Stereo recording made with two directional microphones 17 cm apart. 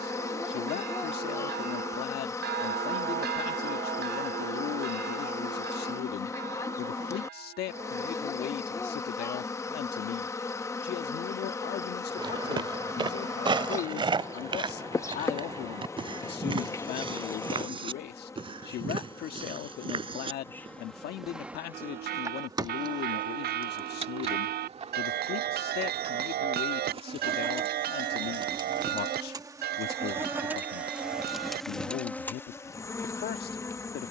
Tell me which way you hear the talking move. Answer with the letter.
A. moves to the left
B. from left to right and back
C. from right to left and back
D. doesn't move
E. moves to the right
D.